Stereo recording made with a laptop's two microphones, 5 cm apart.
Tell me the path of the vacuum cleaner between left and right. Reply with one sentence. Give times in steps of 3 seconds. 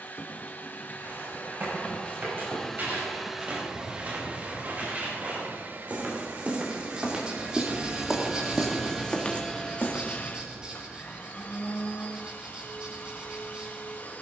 In this clip you hear the vacuum cleaner on the left from 0 s, on the right from 3 s and on the left from 9 s.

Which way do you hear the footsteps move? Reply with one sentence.
You can hear the footsteps travel towards the left.